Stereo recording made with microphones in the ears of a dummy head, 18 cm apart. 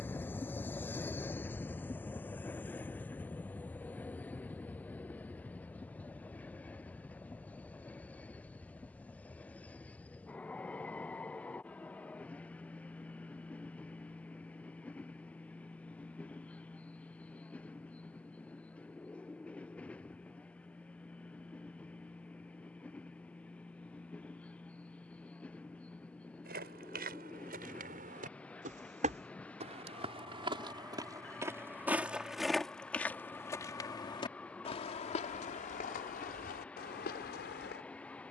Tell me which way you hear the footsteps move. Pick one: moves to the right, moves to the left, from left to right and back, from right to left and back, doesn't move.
moves to the left.